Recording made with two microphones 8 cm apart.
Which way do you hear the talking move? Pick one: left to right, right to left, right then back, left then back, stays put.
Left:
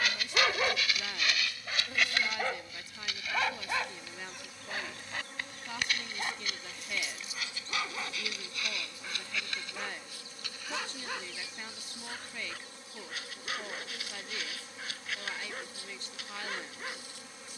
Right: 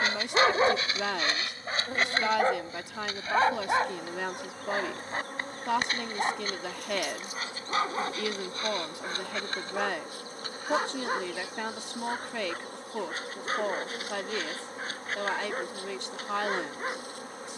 stays put.